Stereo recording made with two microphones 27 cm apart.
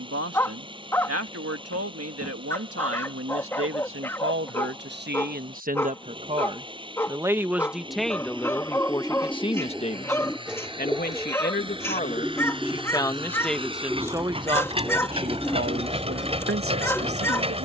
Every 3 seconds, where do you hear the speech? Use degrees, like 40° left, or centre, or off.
60° right, 40° right, 10° right, 30° left, centre, 50° right.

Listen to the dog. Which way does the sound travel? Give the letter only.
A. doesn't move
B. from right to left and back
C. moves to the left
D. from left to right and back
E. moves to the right
A.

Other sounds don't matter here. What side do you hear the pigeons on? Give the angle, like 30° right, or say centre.
centre.